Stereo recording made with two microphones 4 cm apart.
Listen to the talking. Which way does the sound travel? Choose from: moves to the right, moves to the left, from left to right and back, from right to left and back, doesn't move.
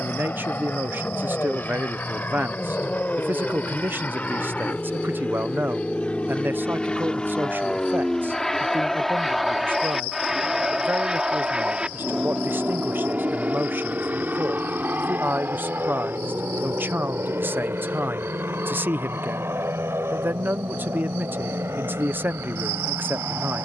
doesn't move.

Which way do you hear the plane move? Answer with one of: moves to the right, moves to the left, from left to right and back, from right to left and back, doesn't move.
moves to the right.